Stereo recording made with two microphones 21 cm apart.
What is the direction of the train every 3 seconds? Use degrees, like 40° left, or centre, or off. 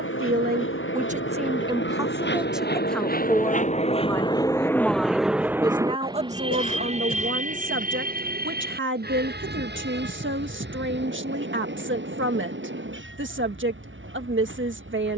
70° left, 20° left, 30° right, 50° right, 60° right.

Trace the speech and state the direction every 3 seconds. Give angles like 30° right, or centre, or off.
20° right, centre, 50° right, 60° right, 60° right.